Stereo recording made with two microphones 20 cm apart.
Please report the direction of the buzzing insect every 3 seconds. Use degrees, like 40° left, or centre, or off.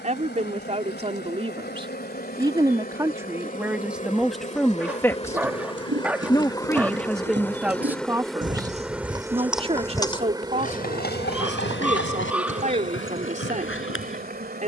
50° left, 40° left, 10° left, 20° right, 40° right.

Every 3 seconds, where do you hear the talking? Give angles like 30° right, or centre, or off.
30° right, centre, centre, 30° right, 40° right.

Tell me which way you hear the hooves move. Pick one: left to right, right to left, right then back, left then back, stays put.
right to left.